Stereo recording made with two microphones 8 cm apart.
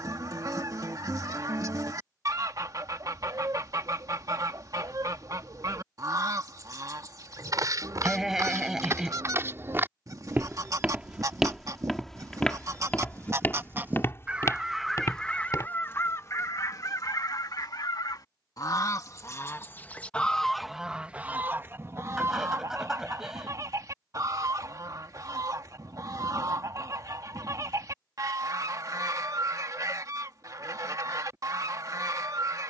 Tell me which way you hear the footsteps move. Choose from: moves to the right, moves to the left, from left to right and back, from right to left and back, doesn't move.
moves to the left.